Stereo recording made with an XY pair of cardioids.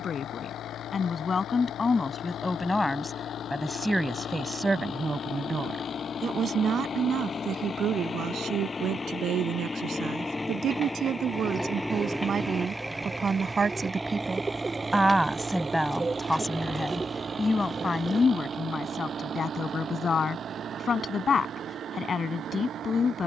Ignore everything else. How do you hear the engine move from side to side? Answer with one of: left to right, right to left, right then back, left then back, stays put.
left to right.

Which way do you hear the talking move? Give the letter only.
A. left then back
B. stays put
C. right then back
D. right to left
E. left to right
C.